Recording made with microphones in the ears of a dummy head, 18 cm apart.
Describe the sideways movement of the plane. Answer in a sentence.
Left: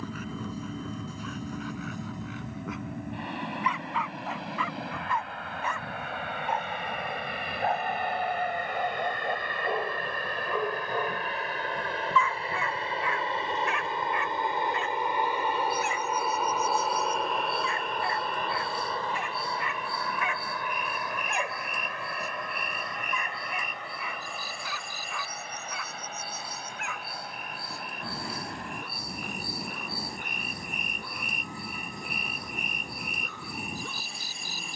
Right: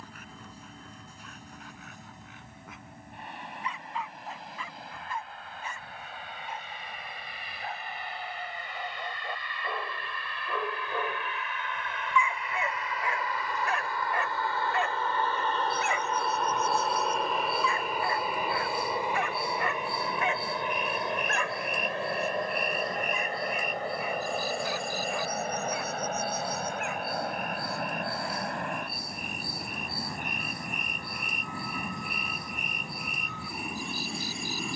In this clip you hear the plane go from the left side to the right.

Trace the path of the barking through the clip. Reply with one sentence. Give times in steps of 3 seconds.
You can hear the barking on the left from 0 s, in the centre from 9 s, on the right from 12 s and on the left from 21 s.